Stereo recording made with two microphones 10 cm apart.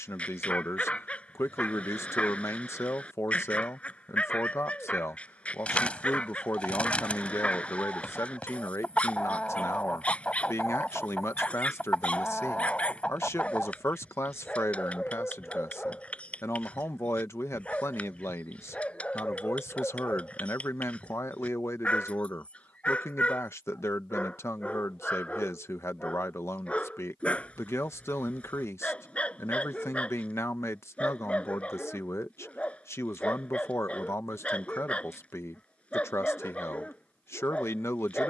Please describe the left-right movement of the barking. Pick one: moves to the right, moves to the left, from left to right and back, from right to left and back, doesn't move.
doesn't move.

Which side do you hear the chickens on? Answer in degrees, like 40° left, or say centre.
10° left.